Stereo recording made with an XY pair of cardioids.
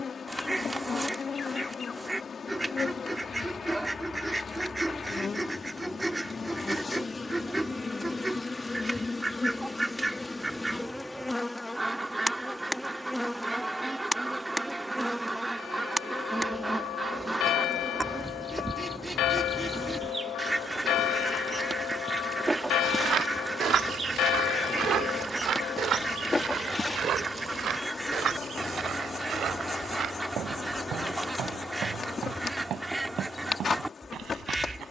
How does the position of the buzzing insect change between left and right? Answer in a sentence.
In this clip you hear the buzzing insect move from left to right and back again.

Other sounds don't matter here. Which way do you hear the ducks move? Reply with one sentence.
In this clip you hear the ducks stay put.